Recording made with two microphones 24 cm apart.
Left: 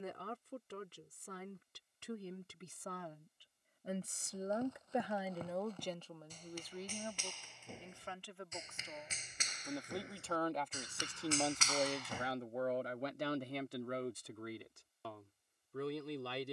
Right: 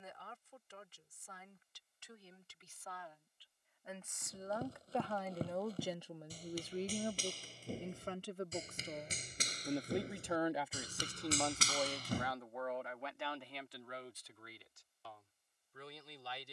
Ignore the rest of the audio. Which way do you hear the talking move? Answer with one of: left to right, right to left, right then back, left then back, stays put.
right then back.